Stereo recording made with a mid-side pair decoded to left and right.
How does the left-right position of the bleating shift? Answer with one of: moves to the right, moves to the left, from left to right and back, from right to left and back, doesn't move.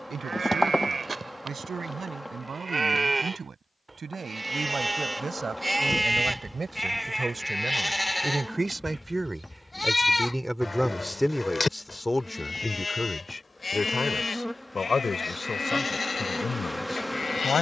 moves to the left.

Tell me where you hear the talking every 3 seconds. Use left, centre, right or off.
right, right, right, centre, left, left.